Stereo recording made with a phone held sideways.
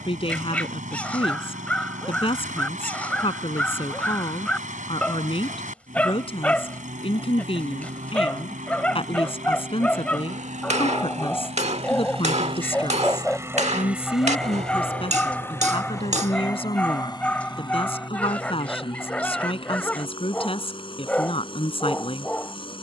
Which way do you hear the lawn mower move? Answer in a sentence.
In this clip you hear the lawn mower move to the left.